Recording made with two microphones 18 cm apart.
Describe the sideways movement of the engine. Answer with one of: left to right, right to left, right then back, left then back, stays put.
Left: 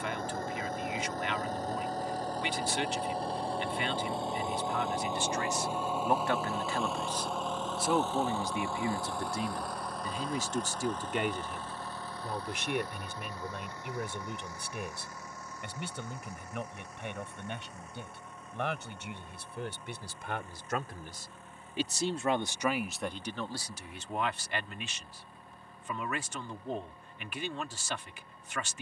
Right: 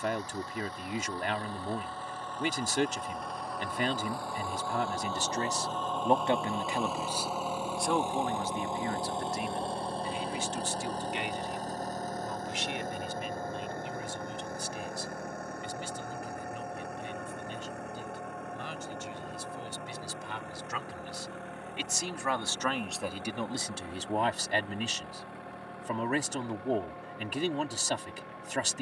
left to right.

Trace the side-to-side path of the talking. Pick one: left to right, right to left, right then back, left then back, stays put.
left then back.